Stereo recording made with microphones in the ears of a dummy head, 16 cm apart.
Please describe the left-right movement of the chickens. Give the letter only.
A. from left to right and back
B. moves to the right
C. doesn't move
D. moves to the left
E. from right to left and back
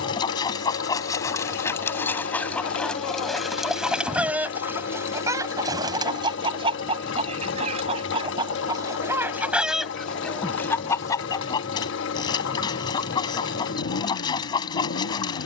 A.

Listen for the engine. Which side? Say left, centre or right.
left.